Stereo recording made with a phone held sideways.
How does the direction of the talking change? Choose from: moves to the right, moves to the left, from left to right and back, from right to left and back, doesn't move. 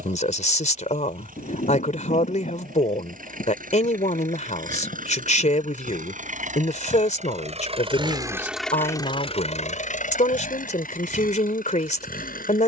doesn't move.